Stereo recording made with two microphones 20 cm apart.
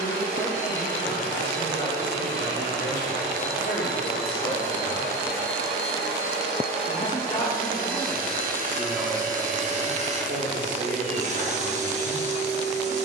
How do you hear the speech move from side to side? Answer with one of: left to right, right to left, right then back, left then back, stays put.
left to right.